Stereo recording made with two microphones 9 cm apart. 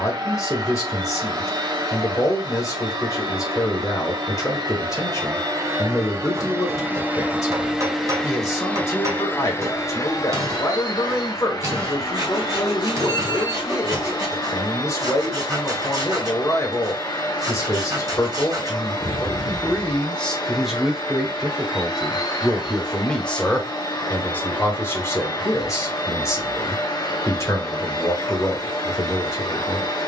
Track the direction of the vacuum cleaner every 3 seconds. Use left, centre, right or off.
right, right, centre, left, left, left, left, left, left, left.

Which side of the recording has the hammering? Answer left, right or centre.
right.